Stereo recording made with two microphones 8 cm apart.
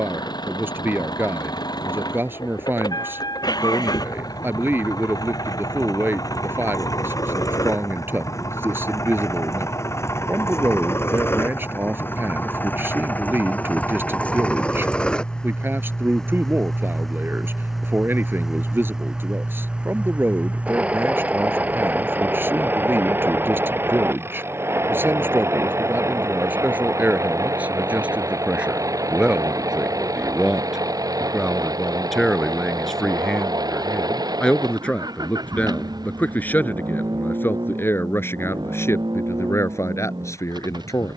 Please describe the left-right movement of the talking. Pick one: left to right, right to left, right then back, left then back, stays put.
right to left.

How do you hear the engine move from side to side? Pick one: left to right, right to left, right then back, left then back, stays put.
left to right.